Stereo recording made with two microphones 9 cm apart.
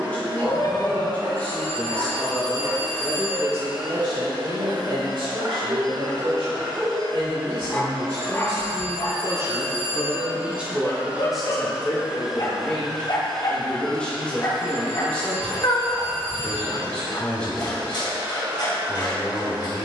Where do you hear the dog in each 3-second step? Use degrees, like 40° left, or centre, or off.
70° right, 50° right, centre, 50° left, 50° left, 50° left, 50° left.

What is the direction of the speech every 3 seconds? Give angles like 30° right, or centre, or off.
20° left, 50° right, 60° right, 10° right, 10° left, 10° left, 10° left.